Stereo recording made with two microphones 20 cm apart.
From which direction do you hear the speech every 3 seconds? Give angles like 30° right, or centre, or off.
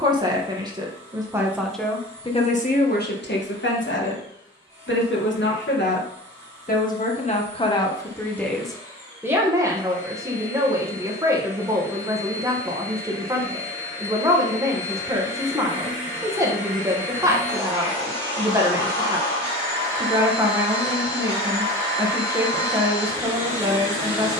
centre, 60° left, 20° left, 20° right, 20° right, 20° right, 20° right, 20° right.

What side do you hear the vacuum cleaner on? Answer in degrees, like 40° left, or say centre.
10° left.